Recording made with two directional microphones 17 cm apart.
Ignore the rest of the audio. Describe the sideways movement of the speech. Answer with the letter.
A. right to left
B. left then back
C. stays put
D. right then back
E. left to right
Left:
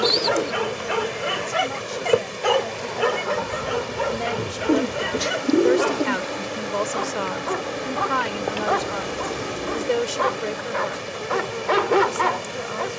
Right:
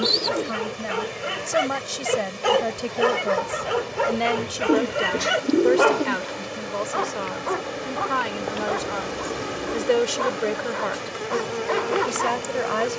B.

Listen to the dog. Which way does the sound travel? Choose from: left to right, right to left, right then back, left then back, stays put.
right then back.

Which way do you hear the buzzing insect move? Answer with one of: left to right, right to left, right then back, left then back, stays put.
left to right.